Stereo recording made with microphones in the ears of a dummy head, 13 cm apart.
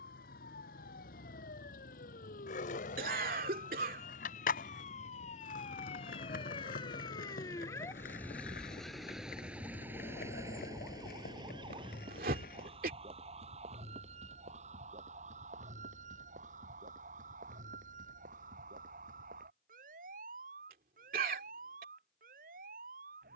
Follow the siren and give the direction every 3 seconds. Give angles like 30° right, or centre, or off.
70° left, 60° left, 20° left, 20° right, 50° right, 60° right, 60° right, 70° right.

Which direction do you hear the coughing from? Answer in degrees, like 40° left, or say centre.
70° right.